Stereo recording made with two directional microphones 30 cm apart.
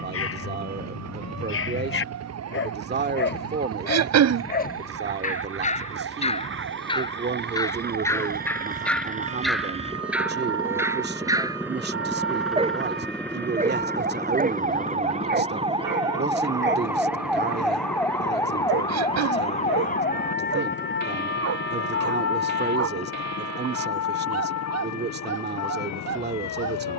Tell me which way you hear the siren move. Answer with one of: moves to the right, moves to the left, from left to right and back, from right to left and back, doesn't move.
moves to the left.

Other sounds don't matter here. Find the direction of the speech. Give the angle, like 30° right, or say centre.
30° right.